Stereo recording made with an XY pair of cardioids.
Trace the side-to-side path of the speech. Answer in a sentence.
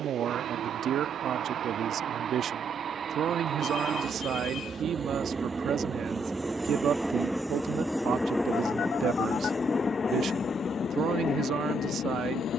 You can hear the speech stay put.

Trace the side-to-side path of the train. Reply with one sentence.
In this clip you hear the train move from right to left.